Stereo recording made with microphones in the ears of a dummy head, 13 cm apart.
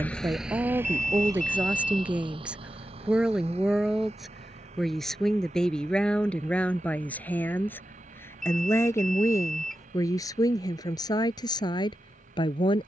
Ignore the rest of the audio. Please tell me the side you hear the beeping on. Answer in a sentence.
You can hear the beeping in the centre.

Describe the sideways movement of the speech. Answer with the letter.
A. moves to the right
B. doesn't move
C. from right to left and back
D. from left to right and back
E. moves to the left
E.